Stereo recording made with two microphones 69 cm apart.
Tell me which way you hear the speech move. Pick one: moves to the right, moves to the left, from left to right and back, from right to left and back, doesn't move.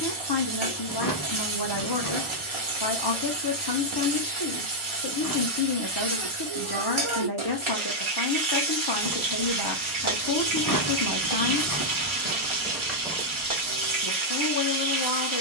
doesn't move.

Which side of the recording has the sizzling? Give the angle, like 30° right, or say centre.
40° right.